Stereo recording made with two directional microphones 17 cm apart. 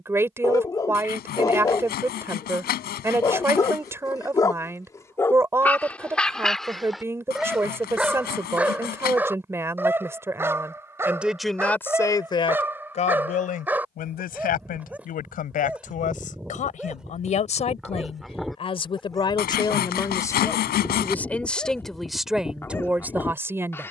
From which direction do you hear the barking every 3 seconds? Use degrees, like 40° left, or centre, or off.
20° left, 20° left, centre, 10° right, 10° right, 10° right, centre, 10° left.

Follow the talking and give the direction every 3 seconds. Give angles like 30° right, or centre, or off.
20° right, 20° right, 20° right, 10° right, 50° left, 50° left, 30° left, centre.